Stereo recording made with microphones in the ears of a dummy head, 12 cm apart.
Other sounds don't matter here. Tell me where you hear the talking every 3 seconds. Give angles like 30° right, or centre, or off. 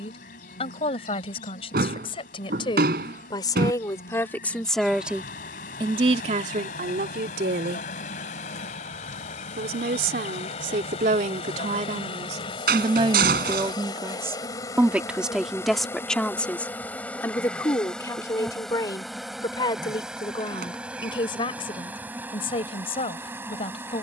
40° left, 10° left, 70° right, 70° right, 30° right, 10° left, 30° left, 40° left.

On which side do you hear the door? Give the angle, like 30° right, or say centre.
70° right.